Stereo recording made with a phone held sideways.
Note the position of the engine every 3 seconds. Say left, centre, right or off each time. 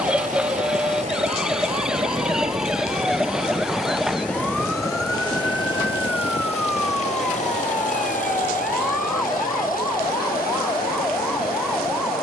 right, centre, left, left.